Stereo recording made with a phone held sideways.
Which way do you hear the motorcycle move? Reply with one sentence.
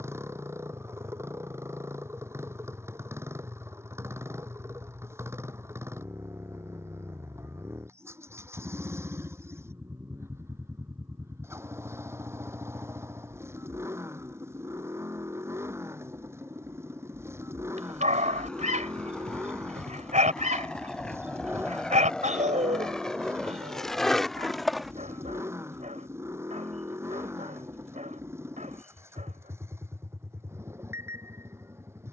You can hear the motorcycle stay put.